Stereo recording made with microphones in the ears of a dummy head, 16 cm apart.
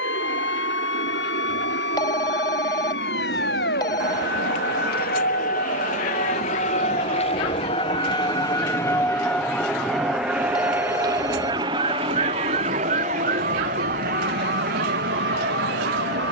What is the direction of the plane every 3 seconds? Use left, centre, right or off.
left, left, left, centre, right, right.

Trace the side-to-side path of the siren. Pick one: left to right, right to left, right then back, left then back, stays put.
left to right.